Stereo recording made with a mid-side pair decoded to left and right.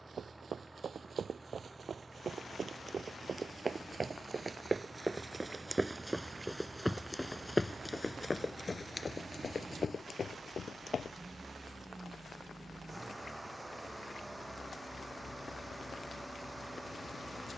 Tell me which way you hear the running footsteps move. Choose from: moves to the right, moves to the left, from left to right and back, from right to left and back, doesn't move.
moves to the left.